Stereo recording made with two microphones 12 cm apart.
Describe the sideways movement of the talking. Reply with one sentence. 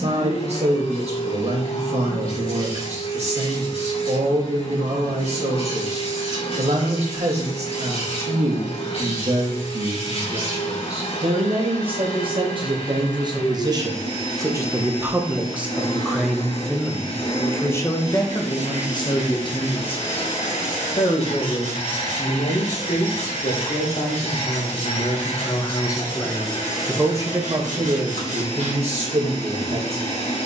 You can hear the talking go left and come back.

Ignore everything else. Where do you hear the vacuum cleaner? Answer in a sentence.
You can hear the vacuum cleaner on the left.